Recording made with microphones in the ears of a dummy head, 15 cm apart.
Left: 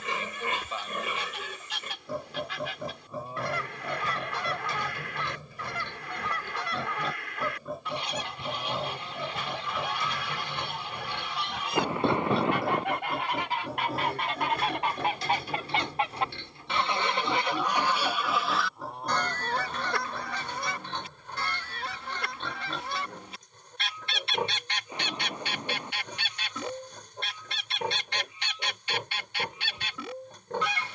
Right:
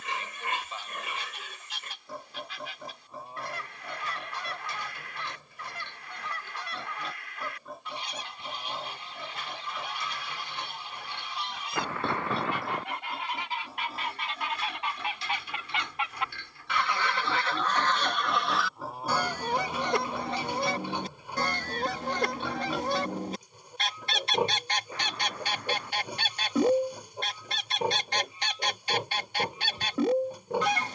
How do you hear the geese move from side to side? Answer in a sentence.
In this clip you hear the geese move to the right.